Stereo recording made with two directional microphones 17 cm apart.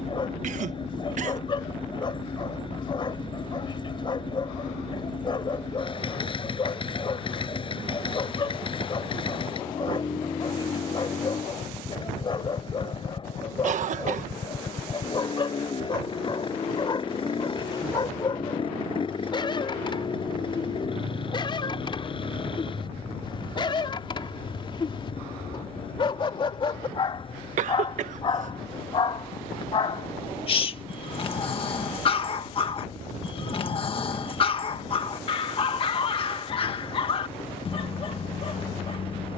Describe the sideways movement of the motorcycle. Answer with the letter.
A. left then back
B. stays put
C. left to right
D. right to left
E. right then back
B.